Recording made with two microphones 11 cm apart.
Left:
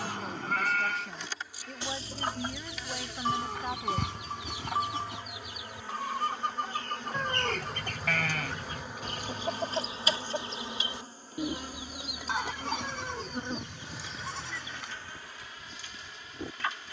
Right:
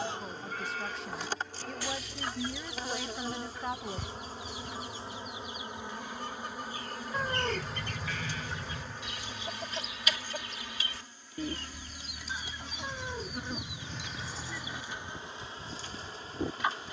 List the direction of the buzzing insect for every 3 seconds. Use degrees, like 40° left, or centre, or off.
40° right, 30° right, centre, 30° left, 20° left, 30° right.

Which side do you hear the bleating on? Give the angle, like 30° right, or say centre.
60° left.